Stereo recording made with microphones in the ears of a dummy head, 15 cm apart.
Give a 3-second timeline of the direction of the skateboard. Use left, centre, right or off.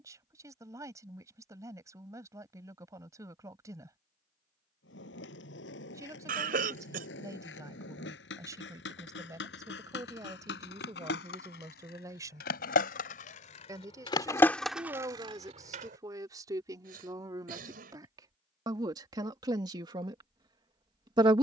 off, left, left, left, left, right, off.